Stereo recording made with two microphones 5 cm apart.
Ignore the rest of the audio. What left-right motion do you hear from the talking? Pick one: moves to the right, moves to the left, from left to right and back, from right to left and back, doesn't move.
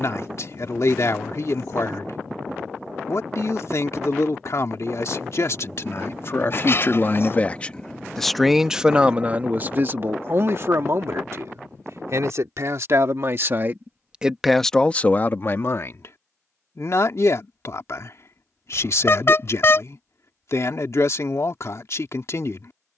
from left to right and back.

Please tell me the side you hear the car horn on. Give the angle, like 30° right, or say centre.
50° left.